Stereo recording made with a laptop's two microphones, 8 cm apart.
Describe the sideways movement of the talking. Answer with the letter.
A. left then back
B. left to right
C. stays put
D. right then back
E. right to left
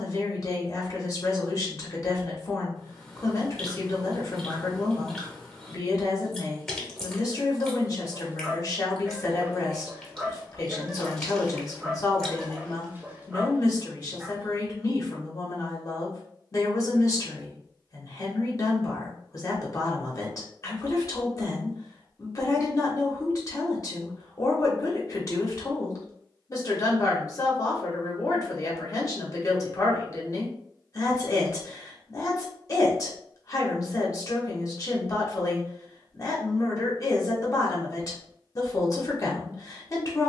C.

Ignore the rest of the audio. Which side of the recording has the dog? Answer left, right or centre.
right.